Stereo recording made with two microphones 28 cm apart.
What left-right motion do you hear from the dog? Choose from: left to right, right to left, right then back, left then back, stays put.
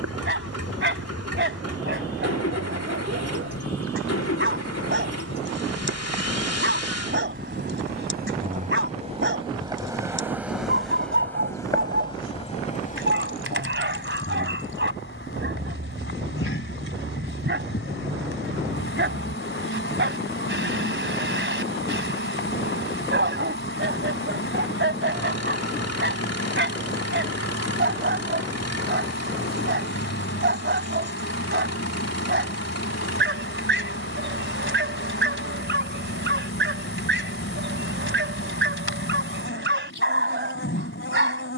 stays put.